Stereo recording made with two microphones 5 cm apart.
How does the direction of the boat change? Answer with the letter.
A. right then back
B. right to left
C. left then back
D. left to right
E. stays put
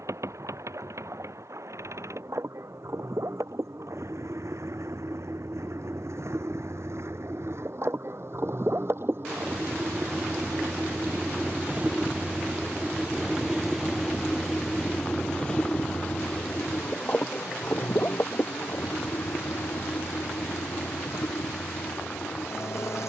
B.